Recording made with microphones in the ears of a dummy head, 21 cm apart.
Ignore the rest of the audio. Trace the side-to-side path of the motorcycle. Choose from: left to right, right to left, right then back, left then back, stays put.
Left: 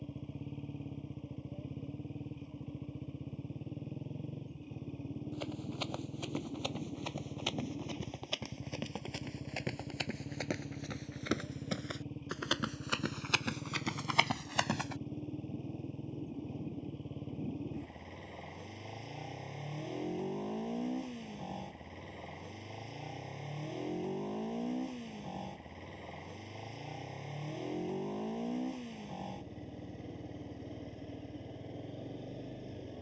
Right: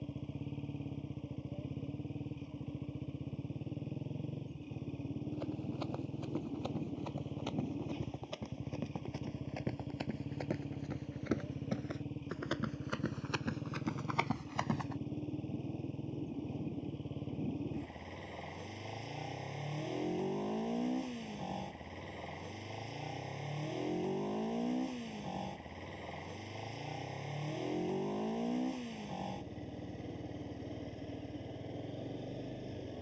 stays put.